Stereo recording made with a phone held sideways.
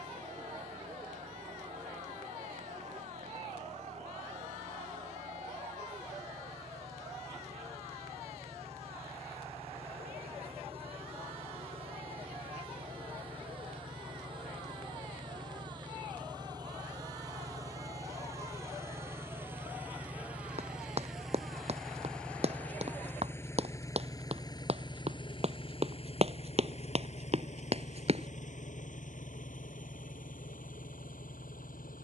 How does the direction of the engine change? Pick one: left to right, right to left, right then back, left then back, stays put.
right to left.